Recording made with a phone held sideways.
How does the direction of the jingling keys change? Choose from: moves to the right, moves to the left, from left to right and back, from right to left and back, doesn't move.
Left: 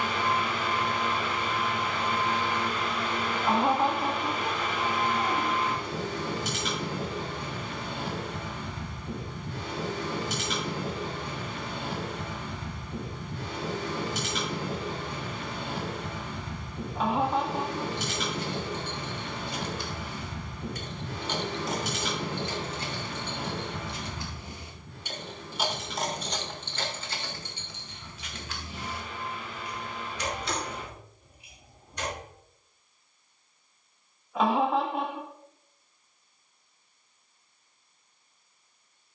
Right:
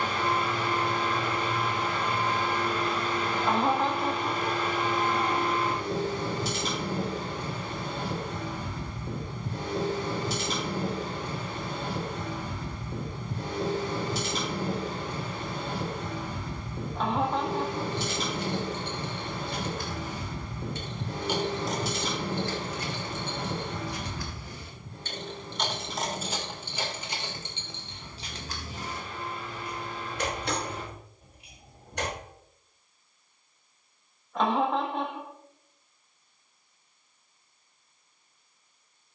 from right to left and back.